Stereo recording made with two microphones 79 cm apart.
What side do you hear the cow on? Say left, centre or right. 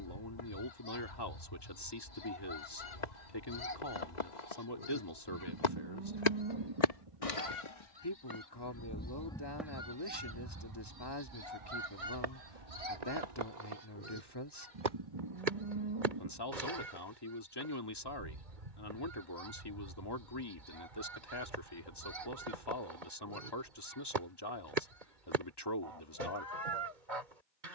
right.